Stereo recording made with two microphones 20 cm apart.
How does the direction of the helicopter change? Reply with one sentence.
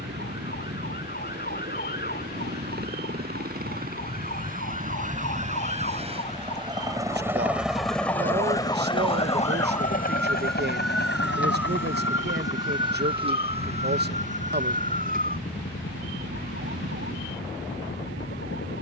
In this clip you hear the helicopter move to the left.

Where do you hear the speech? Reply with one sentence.
In this clip you hear the speech on the right.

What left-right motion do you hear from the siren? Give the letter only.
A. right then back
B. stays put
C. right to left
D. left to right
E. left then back
D.